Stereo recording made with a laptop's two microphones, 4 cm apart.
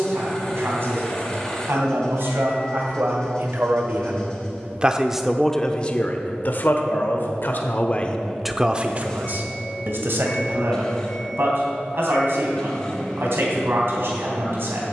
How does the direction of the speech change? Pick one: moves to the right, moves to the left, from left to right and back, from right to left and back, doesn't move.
from right to left and back.